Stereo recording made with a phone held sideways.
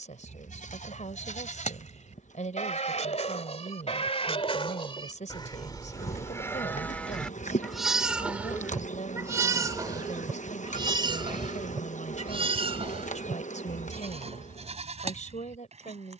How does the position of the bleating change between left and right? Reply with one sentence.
In this clip you hear the bleating move from left to right.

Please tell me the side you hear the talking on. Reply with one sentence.
You can hear the talking on the left.